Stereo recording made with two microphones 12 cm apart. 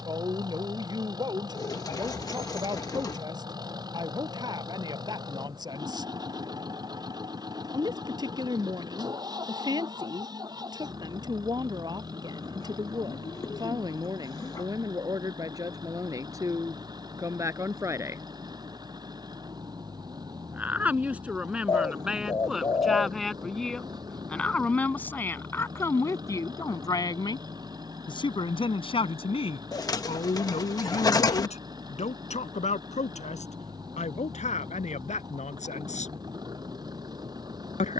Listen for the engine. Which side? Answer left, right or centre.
right.